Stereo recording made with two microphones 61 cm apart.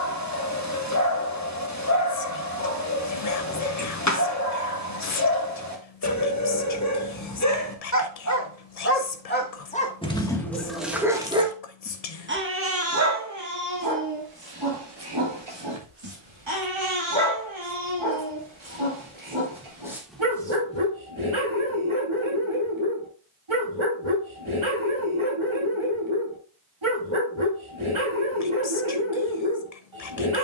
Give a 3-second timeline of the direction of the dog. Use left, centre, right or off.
left, left, left, centre, right, right, right, right, right, right.